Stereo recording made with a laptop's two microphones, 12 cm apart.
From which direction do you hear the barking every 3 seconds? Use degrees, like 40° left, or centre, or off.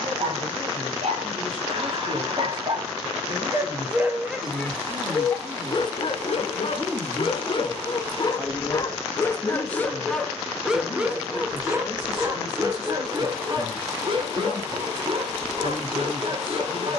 50° right, 10° left, 40° left, centre, 40° right, 50° right.